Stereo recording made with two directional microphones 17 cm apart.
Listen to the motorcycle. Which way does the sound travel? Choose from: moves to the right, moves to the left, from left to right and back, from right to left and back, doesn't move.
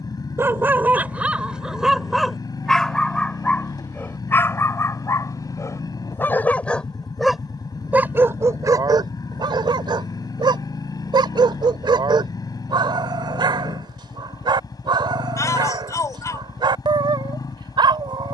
doesn't move.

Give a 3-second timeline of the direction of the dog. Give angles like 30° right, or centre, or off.
10° right, 10° left, 10° right, 30° right, 30° right, 30° right.